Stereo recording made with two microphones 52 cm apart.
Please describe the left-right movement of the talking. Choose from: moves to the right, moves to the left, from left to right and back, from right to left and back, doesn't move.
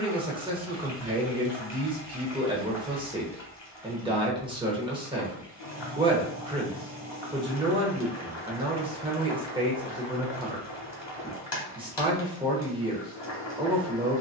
doesn't move.